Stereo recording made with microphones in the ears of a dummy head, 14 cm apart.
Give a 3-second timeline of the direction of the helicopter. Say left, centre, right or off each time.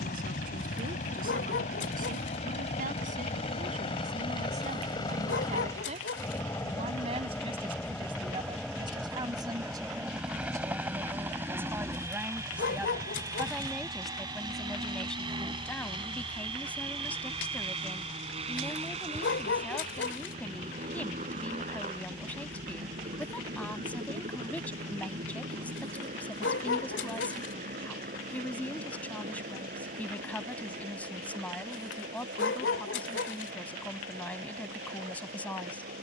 left, left, centre, centre, right, right, right, right, right, right, right, right.